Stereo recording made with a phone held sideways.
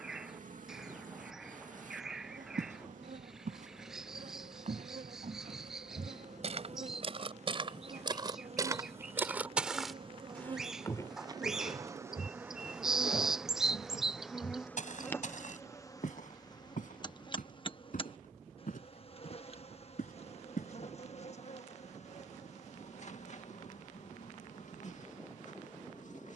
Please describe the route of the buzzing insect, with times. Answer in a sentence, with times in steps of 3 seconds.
In this clip you hear the buzzing insect on the right from 0 s, in the centre from 12 s and on the left from 15 s.